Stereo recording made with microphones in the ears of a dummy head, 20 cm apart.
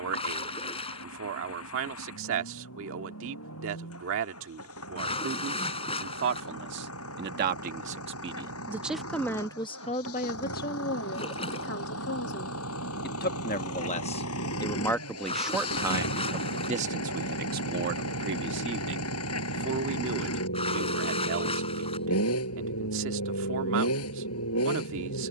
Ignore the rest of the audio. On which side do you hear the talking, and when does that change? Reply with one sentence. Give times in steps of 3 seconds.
In this clip you hear the talking on the right from 0 s, on the left from 9 s and on the right from 15 s.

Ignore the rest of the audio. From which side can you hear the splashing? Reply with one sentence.
In this clip you hear the splashing on the left.